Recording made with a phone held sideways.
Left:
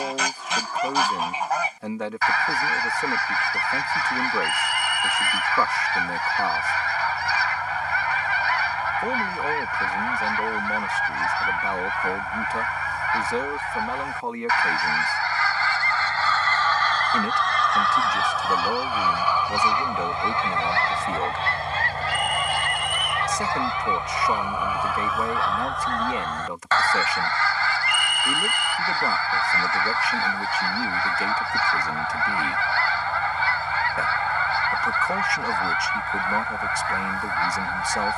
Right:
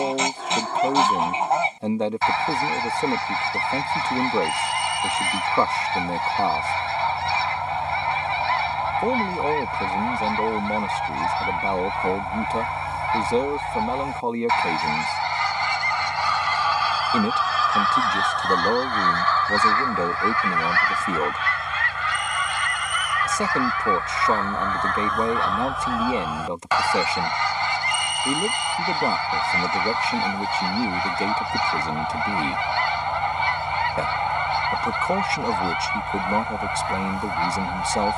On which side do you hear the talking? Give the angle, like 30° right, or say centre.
30° right.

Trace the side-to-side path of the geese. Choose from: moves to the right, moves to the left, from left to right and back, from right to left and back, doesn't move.
from right to left and back.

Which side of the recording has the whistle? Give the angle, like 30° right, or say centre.
60° left.